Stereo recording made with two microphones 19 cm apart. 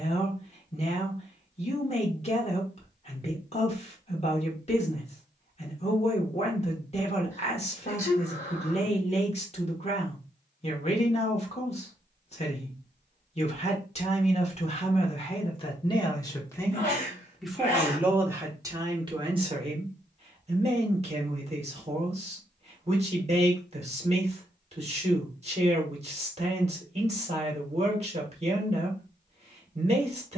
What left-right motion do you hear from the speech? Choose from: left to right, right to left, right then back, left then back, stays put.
left to right.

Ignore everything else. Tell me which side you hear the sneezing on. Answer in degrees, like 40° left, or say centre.
20° left.